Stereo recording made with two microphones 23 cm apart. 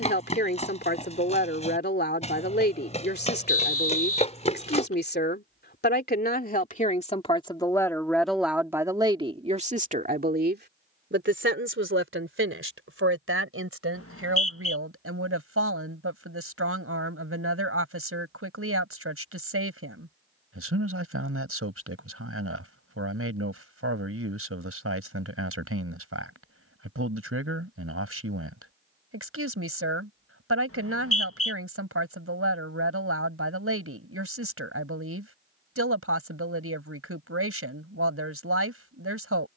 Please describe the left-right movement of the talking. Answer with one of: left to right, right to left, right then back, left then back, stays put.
left to right.